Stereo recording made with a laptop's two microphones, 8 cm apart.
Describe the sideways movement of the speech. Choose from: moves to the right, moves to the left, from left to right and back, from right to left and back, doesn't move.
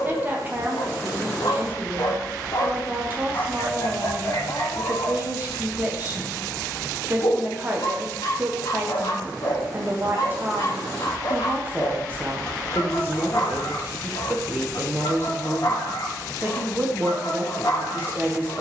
doesn't move.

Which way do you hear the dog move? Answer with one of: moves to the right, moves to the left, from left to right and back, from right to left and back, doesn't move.
doesn't move.